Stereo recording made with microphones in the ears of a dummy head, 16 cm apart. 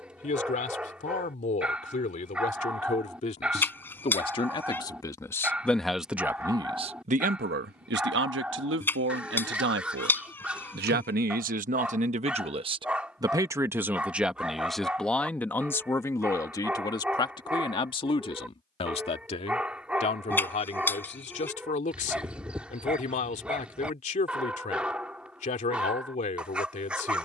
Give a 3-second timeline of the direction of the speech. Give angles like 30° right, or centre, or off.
40° left, 20° left, 50° right, 60° right, 20° right, 20° left, 30° left, 40° left, 40° left.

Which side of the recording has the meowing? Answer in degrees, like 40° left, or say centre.
10° left.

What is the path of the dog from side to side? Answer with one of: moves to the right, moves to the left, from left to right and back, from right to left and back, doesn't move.
doesn't move.